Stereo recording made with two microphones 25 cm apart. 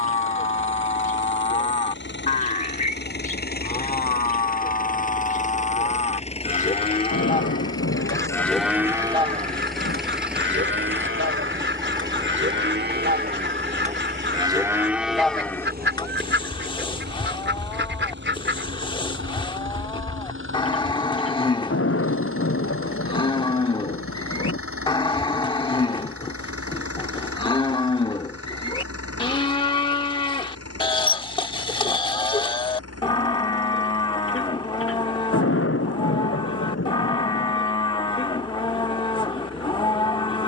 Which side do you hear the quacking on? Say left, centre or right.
right.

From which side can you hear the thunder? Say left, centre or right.
left.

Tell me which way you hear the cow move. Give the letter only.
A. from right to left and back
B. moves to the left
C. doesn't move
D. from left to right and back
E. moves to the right
D.